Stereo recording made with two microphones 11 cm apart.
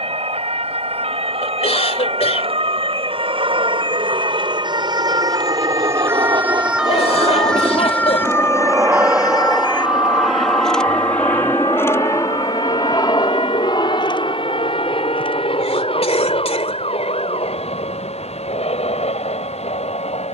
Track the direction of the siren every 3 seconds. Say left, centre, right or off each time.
right, right, centre, left, left, left, left.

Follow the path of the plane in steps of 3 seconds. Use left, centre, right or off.
right, right, right, centre, left, left, left.